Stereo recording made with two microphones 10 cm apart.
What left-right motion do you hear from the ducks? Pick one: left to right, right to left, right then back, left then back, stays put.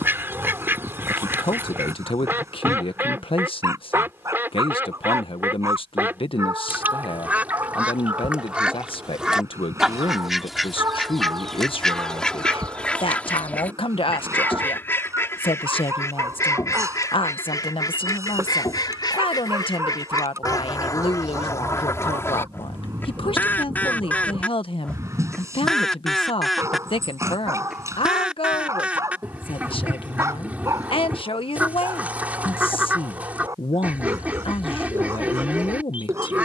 left then back.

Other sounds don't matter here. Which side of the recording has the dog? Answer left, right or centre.
right.